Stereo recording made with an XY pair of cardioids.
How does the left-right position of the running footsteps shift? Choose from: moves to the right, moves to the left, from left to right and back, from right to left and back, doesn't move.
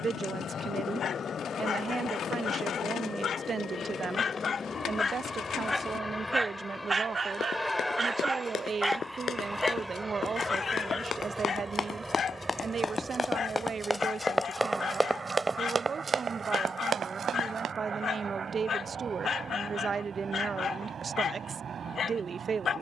moves to the right.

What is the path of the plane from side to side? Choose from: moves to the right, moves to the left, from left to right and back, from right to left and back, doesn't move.
moves to the right.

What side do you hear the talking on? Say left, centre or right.
right.